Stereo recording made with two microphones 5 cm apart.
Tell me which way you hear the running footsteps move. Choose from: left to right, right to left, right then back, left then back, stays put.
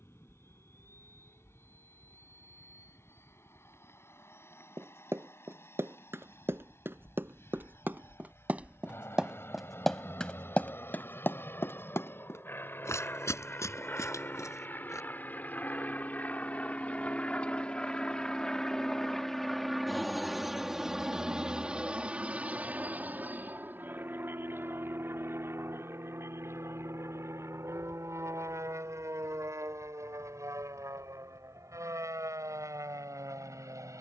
right to left.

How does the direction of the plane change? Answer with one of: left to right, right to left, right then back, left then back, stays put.
left to right.